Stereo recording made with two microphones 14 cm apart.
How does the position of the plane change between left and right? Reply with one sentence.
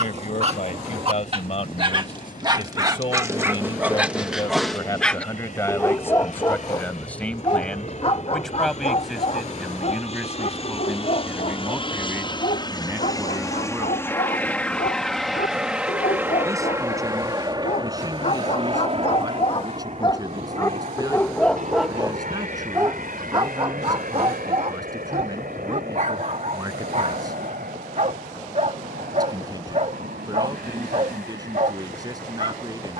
In this clip you hear the plane go from the left side to the right.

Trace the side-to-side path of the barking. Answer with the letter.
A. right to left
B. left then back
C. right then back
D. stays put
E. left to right
B.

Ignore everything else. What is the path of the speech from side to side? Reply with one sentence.
You can hear the speech move to the right.